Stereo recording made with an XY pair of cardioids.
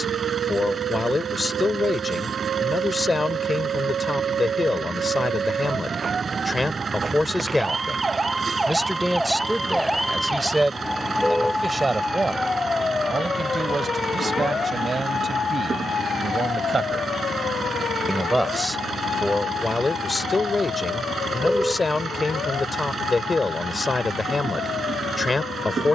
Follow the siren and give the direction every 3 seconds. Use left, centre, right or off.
right, right, right, centre, left, left, left, left, left.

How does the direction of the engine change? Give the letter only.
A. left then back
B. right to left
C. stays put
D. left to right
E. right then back
C.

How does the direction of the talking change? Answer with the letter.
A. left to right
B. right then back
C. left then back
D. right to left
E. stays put
B.